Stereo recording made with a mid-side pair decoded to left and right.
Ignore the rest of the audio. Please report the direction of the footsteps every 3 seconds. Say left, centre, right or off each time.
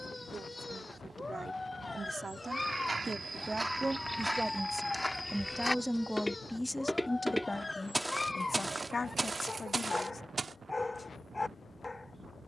right, centre, centre, right.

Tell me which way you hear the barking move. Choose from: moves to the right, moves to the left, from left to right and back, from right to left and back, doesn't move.
doesn't move.